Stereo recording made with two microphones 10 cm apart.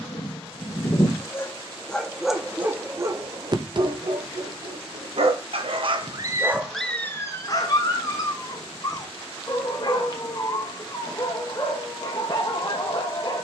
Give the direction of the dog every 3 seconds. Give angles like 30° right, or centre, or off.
10° left, 60° right, 20° left, 40° left, 40° left.